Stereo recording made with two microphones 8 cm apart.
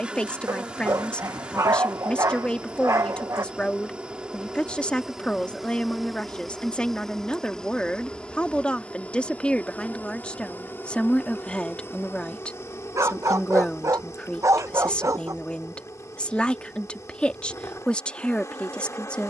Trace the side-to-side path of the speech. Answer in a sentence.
You can hear the speech stay in one place.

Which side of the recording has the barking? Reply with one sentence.
You can hear the barking on the right.